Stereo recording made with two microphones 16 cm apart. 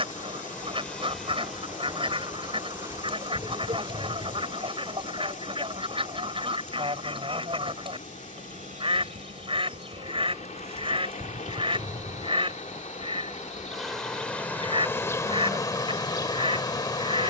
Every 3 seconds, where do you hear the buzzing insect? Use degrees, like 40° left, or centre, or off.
centre, 40° right, 60° right, 40° right, centre, 20° left.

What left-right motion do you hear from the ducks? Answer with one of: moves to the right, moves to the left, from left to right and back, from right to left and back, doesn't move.
doesn't move.